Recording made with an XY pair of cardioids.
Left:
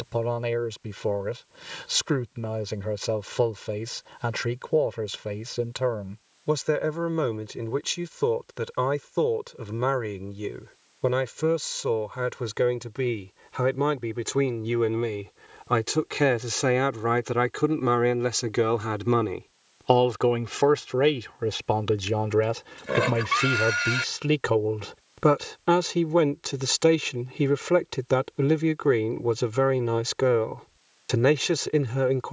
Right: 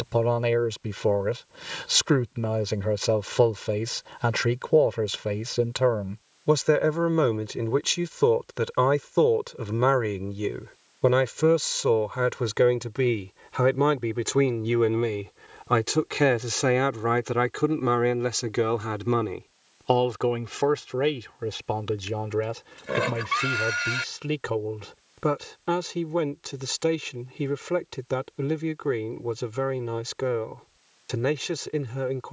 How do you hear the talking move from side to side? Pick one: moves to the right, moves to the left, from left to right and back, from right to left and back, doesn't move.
moves to the left.